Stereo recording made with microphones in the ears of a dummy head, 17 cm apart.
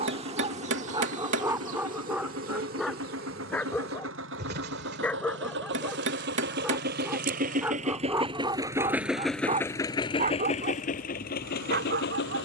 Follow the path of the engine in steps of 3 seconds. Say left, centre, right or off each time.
right, right, right, left.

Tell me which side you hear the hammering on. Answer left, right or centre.
right.